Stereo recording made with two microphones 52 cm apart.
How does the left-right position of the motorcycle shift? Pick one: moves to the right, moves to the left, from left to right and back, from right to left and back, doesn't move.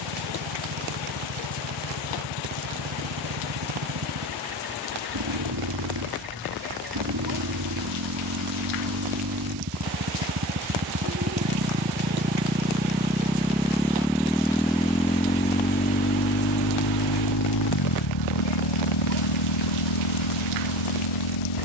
moves to the left.